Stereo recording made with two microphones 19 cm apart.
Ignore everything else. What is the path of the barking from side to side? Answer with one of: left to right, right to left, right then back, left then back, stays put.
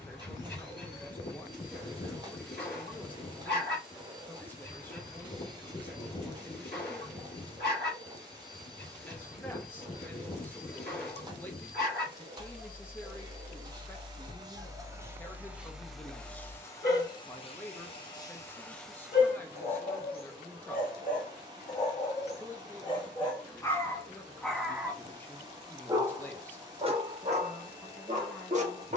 left to right.